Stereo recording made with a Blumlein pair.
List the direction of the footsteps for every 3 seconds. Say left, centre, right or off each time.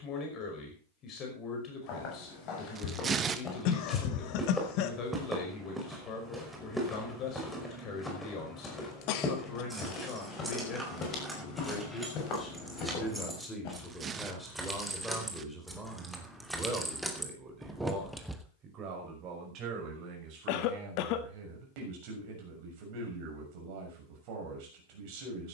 left, centre, centre, left, left, off, off, off, off.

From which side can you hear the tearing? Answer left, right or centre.
right.